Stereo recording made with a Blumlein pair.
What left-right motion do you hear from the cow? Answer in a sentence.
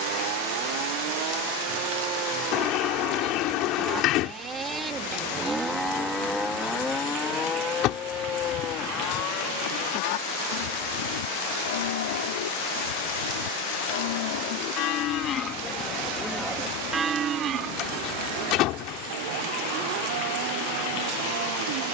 You can hear the cow move from right to left and back again.